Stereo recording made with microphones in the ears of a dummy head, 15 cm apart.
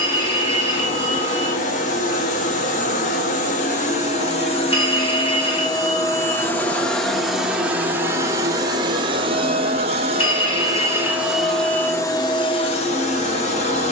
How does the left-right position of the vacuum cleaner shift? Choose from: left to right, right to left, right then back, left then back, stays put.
right then back.